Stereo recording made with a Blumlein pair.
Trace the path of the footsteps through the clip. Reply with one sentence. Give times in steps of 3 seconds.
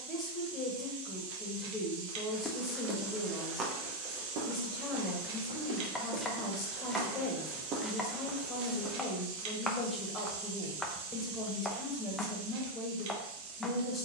You can hear the footsteps in the centre from 0 s, on the right from 3 s and not at all from 9 s.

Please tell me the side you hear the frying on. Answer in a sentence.
In this clip you hear the frying on the right.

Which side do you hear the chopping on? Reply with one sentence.
In this clip you hear the chopping in the centre.